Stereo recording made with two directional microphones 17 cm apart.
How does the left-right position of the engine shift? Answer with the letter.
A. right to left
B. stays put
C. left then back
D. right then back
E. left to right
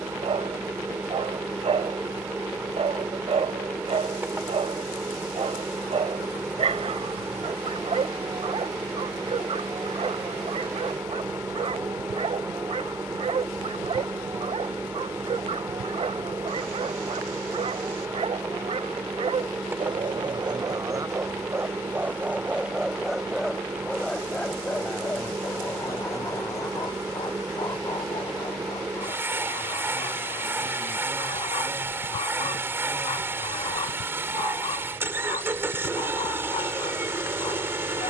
B.